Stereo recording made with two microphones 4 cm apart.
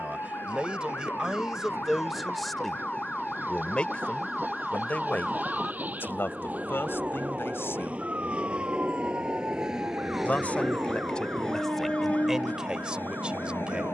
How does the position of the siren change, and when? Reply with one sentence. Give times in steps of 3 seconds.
In this clip you hear the siren on the left from 0 s, in the centre from 3 s and on the right from 6 s.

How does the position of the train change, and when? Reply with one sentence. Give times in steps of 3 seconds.
In this clip you hear the train on the right from 0 s, in the centre from 9 s and on the left from 12 s.